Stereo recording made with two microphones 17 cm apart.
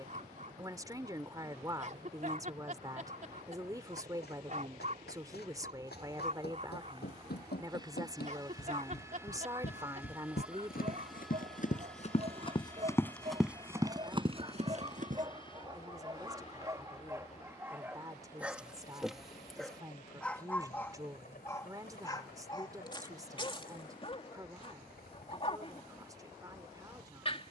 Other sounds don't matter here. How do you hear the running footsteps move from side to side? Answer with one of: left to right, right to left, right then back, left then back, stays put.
left to right.